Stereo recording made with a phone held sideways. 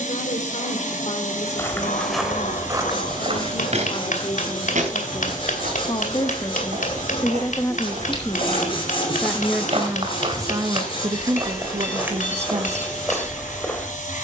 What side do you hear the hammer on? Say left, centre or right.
left.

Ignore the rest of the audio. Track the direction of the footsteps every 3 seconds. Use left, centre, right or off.
centre, right, right, right, centre.